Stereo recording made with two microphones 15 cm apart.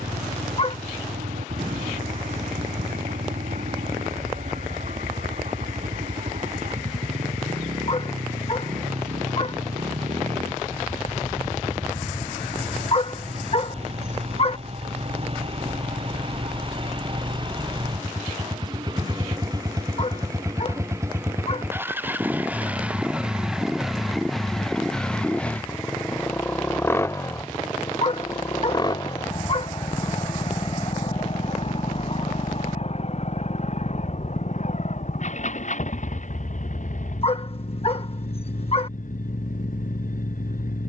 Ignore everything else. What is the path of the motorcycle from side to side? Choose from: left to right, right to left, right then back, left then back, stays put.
right to left.